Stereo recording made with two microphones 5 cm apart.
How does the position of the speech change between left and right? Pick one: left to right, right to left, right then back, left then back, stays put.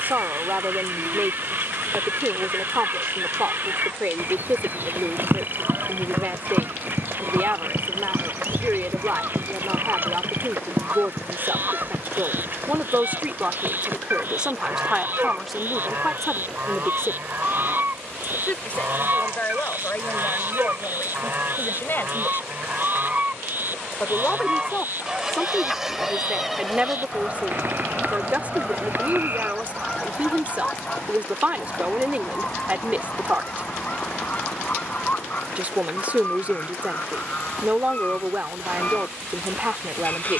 left then back.